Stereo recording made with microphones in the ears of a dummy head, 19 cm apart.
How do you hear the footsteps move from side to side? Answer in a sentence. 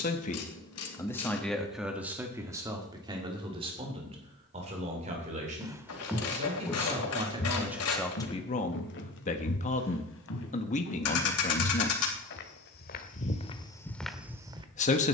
You can hear the footsteps go left and come back.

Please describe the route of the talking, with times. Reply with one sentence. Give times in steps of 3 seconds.
You can hear the talking in the centre from 0 s, on the right from 3 s, in the centre from 6 s and on the left from 9 s.